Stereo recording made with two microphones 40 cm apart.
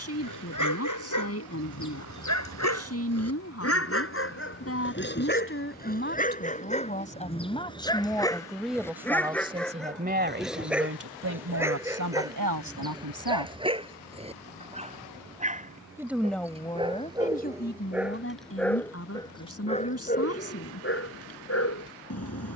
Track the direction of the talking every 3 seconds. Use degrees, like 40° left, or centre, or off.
40° left, 30° left, 10° left, 30° right, 60° right, 10° left, 40° left, off.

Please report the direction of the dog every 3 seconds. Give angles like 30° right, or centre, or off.
50° left, 30° left, 10° left, centre, 10° right, 10° right, 10° left, 40° left.